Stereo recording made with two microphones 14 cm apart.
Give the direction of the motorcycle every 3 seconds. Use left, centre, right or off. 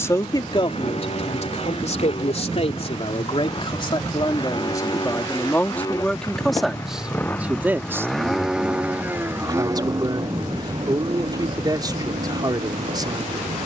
left, left, centre, right, right.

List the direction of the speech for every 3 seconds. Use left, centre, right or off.
left, left, centre, right, right.